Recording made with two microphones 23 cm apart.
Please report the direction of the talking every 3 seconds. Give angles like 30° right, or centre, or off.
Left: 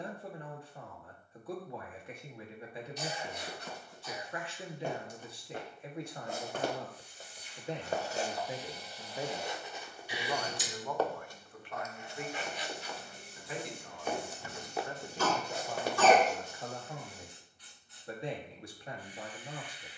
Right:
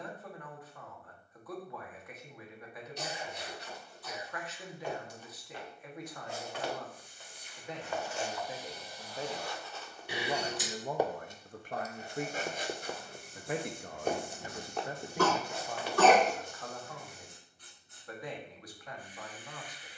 30° left, 30° left, 30° left, 20° right, 50° right, 10° left, 30° left.